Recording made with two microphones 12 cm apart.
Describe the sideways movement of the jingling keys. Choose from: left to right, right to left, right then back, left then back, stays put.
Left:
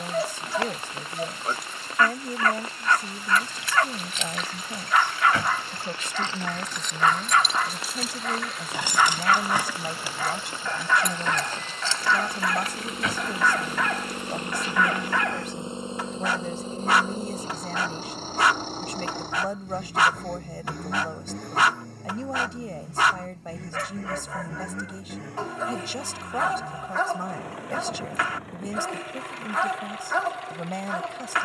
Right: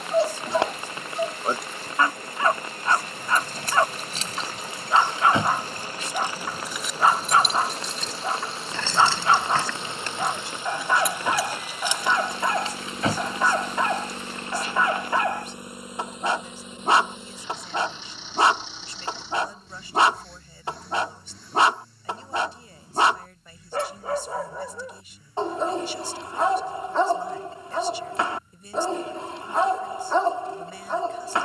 left then back.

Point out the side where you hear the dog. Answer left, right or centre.
right.